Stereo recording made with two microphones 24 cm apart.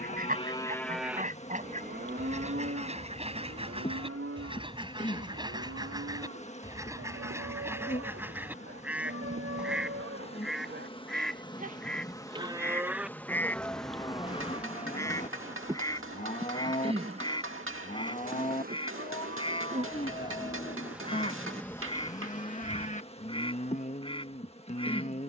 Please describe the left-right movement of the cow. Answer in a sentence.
You can hear the cow go right and come back.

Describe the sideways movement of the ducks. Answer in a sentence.
You can hear the ducks move to the left.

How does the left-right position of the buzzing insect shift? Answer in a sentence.
In this clip you hear the buzzing insect move from left to right and back again.